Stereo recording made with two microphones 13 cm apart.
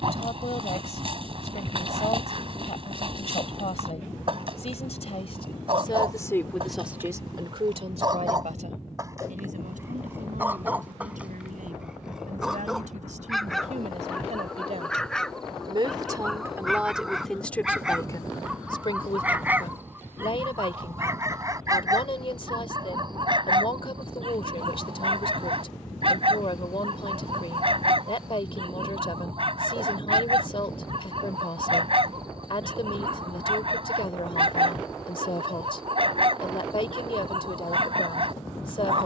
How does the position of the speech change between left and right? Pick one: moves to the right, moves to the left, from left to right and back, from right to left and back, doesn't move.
from left to right and back.